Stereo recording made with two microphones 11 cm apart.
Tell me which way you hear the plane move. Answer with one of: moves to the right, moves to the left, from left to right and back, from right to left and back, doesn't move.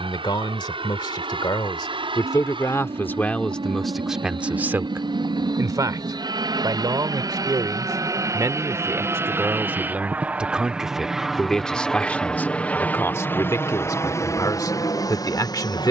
moves to the left.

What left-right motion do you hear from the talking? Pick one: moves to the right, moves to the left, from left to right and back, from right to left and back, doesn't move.
from left to right and back.